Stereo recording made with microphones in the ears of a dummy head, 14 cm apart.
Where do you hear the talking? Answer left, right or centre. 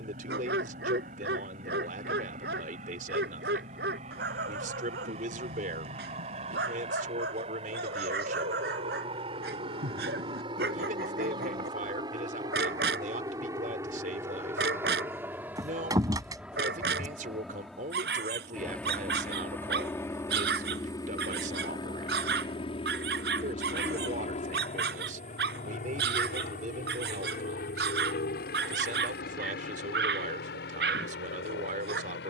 right.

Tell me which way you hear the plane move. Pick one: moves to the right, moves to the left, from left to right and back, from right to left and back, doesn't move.
moves to the left.